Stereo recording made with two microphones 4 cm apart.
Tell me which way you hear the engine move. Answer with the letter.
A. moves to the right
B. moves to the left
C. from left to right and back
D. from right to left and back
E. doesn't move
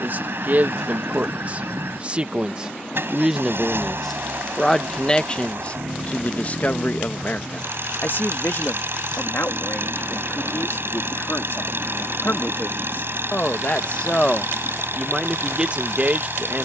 E.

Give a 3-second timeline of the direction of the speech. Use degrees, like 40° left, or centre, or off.
40° right, 10° left, 50° left, 60° left, 40° left, 30° right.